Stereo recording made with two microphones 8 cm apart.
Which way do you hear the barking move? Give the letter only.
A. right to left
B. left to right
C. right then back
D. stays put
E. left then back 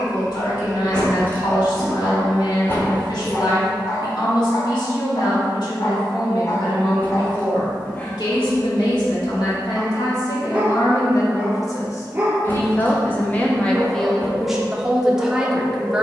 B.